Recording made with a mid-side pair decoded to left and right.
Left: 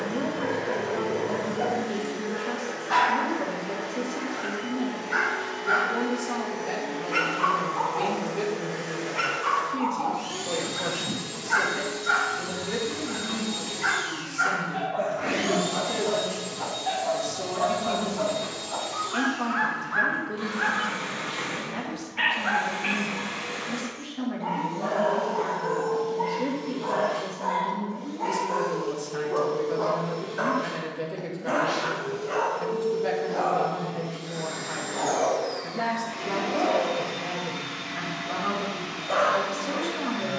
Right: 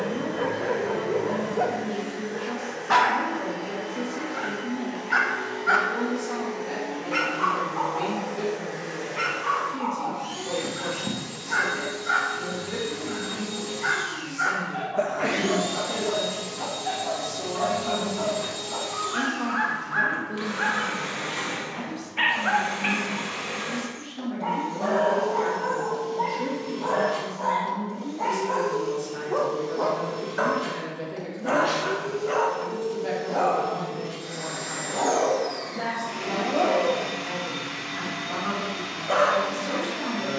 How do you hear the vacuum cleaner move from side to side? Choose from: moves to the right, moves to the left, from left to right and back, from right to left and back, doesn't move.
moves to the right.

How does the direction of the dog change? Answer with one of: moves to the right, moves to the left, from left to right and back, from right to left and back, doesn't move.
from right to left and back.